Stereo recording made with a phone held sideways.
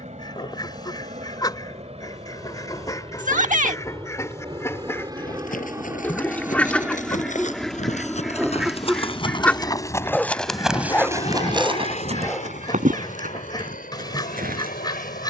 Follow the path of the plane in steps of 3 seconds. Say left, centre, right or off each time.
right, right, centre, left, left.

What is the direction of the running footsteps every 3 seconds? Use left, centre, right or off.
off, left, left, centre, right.